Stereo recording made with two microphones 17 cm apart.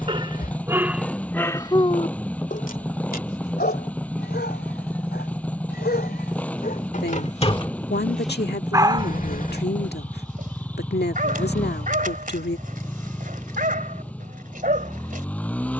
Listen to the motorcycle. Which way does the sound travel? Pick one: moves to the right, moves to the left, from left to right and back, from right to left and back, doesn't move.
doesn't move.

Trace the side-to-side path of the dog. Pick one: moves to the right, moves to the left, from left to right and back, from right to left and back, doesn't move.
from right to left and back.